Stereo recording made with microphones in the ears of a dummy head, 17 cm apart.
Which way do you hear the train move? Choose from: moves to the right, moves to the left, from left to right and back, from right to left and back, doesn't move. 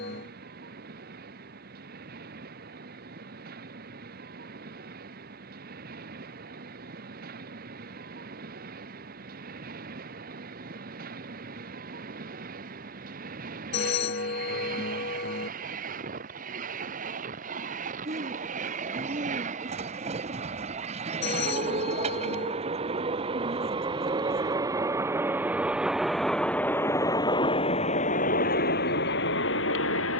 moves to the left.